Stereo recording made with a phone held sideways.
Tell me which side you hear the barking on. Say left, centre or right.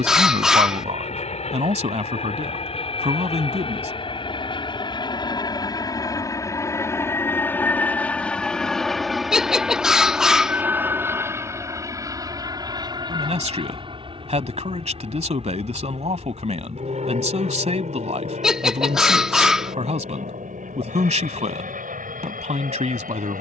centre.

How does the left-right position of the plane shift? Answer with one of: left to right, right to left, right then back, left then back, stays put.
left to right.